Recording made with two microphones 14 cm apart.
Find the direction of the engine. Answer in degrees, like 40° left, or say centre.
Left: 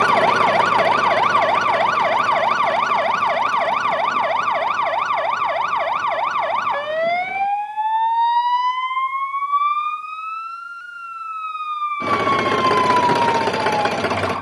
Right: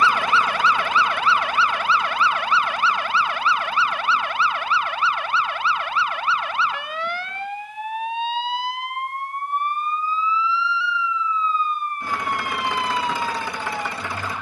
70° left.